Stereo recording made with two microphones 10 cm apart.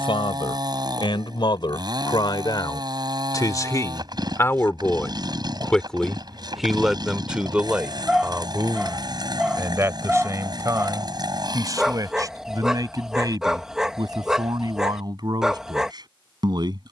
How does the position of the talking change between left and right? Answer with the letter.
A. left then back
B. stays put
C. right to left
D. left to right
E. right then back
D.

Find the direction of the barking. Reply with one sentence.
You can hear the barking in the centre.